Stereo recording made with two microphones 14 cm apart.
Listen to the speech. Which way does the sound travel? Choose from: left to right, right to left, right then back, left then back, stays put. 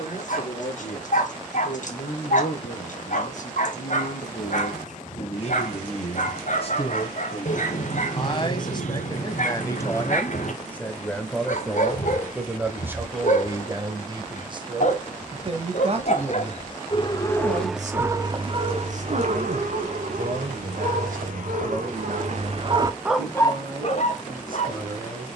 left to right.